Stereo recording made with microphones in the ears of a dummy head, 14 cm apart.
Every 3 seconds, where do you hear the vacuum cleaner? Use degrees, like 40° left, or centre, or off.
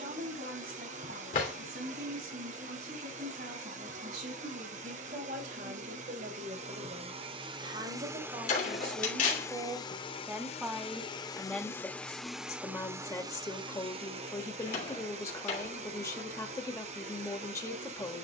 50° right, 50° right, 30° right, 30° left, 30° right, 40° right.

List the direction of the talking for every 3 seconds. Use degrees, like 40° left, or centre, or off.
60° right, 60° right, 40° right, 10° right, 20° left, 20° left.